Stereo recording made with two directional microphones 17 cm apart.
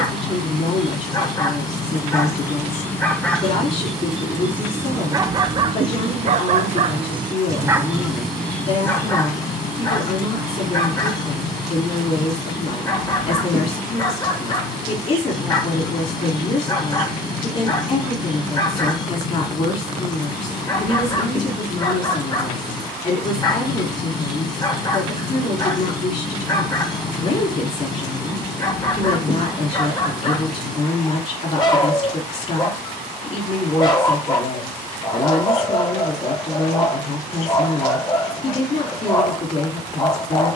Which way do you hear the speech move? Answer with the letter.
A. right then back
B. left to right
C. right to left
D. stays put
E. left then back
D.